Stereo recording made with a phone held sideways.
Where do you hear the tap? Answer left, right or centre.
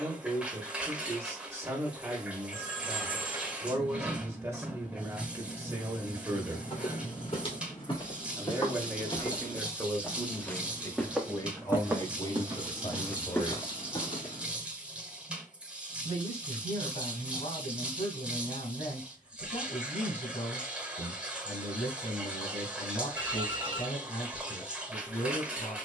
centre.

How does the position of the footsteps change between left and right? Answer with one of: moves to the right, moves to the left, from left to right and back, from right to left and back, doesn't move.
from left to right and back.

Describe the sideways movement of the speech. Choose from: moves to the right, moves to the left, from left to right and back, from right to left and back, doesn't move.
moves to the left.